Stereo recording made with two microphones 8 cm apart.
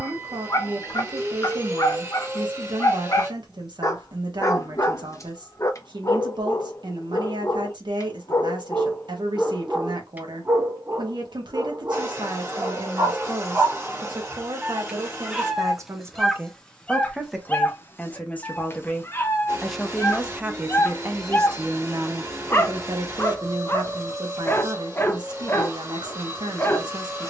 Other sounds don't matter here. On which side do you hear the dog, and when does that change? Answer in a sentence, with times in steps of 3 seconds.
In this clip you hear the dog on the left from 0 s, on the right from 9 s, in the centre from 15 s and on the left from 18 s.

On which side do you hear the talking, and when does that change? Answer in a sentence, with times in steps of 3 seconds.
You can hear the talking on the right from 0 s, in the centre from 18 s and on the right from 21 s.